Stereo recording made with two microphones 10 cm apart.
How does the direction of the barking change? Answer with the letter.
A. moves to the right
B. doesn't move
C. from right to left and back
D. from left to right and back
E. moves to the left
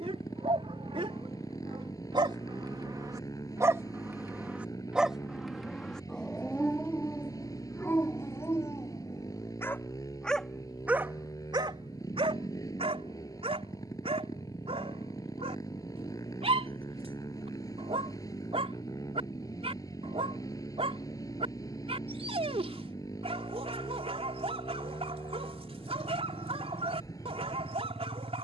C.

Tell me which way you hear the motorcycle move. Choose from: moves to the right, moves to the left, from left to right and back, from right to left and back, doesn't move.
doesn't move.